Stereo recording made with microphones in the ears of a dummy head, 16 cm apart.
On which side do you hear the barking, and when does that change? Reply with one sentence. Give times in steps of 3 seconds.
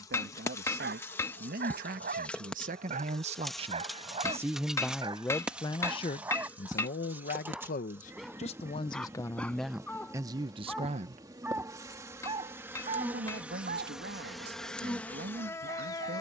In this clip you hear the barking on the right from 0 s, in the centre from 6 s and on the right from 12 s.